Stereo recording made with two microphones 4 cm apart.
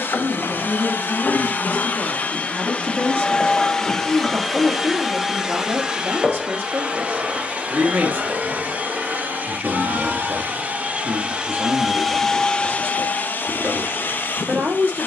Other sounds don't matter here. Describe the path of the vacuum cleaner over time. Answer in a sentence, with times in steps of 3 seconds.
In this clip you hear the vacuum cleaner on the left from 0 s, in the centre from 3 s, on the right from 6 s and on the left from 12 s.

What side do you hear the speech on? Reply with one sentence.
In this clip you hear the speech on the right.